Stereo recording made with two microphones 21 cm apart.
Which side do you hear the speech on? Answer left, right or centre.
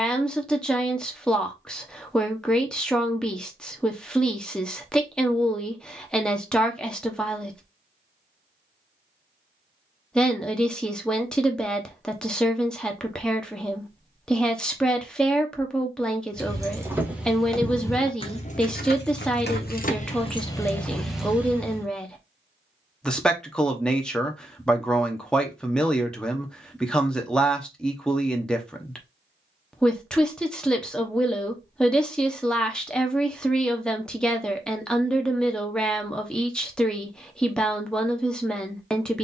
centre.